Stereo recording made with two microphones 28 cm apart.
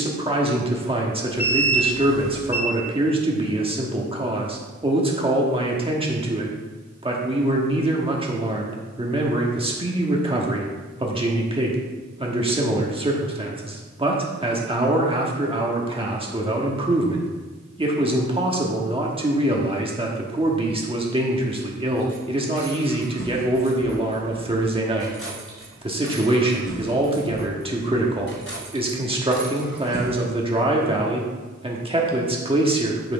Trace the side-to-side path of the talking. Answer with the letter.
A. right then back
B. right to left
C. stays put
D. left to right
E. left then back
C.